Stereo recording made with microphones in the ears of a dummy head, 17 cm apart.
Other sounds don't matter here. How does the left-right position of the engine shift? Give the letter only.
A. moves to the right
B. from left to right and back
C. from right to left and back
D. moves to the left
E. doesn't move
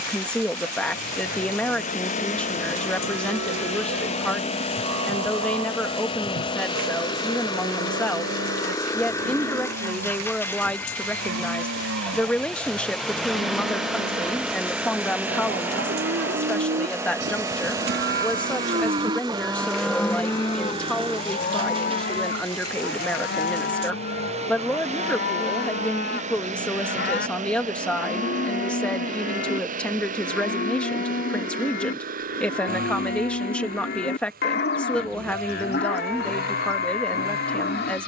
A.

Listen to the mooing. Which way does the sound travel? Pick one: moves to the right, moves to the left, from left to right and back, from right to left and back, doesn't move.
moves to the left.